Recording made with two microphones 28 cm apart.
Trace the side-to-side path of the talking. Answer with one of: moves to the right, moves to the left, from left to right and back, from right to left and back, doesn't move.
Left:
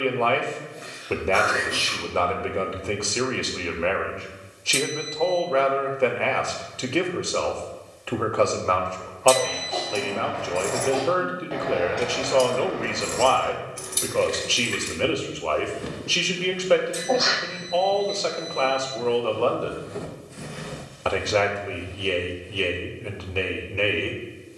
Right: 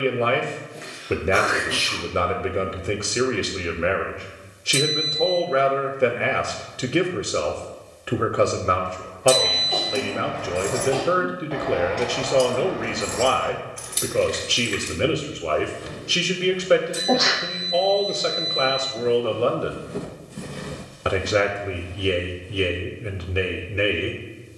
doesn't move.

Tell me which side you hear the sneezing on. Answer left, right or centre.
right.